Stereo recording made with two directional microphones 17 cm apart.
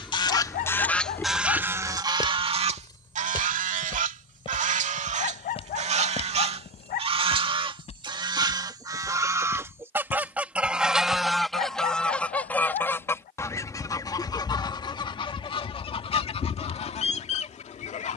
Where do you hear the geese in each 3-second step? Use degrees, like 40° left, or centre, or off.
10° right, 50° right, 30° right, 10° right, 20° left, 40° left.